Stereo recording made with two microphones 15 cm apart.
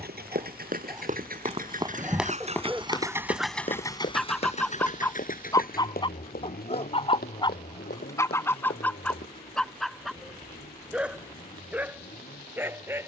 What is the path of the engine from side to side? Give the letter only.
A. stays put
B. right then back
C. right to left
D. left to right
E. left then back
C.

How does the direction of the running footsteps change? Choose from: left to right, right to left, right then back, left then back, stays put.
right to left.